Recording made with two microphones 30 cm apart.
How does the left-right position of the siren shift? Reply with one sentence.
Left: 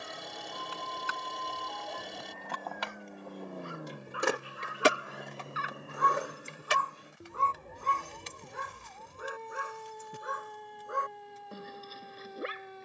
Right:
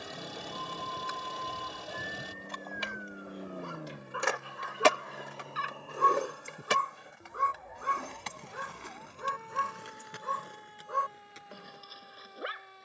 You can hear the siren move to the left.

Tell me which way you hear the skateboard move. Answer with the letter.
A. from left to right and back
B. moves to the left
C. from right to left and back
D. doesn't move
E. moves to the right
E.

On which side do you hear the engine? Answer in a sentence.
You can hear the engine in the centre.